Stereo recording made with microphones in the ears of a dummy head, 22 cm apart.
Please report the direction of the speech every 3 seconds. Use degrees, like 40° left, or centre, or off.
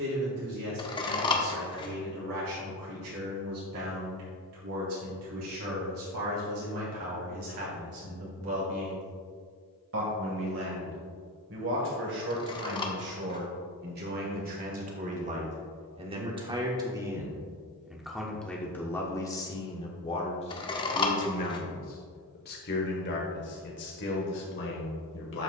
80° right, 70° right, 70° right, 60° right, 50° right, 20° right, 10° left, 40° left, 50° left.